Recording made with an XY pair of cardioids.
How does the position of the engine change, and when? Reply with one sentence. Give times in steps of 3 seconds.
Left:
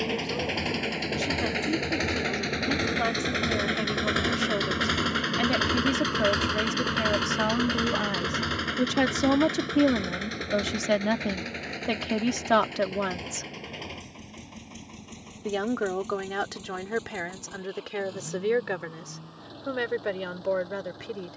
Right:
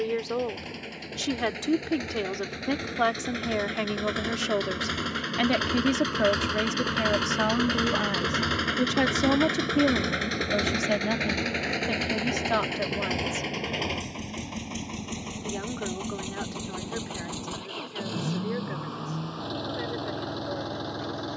You can hear the engine on the left from 0 s, in the centre from 6 s and on the right from 9 s.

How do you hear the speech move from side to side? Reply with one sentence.
You can hear the speech move from right to left.